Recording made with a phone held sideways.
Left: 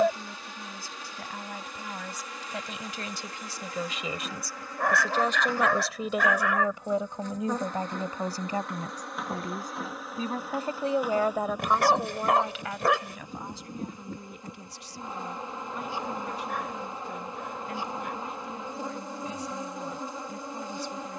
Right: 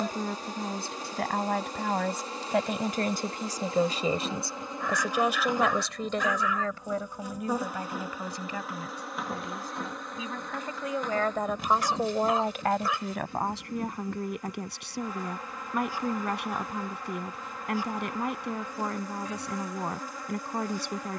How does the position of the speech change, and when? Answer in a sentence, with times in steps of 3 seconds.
You can hear the speech on the right from 0 s, on the left from 6 s and on the right from 12 s.